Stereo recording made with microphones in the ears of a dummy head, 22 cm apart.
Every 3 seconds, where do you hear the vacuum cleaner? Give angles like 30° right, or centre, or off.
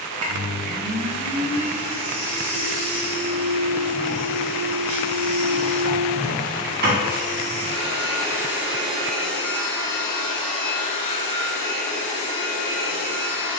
60° right, 60° right, 30° right, 20° left, 30° left.